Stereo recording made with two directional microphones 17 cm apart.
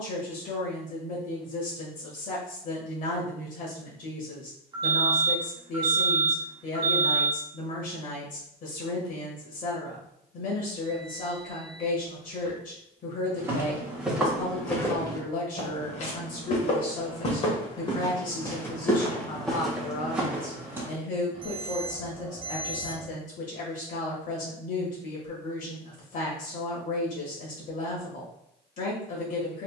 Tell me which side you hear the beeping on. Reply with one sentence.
In this clip you hear the beeping on the right.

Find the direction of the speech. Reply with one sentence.
In this clip you hear the speech on the left.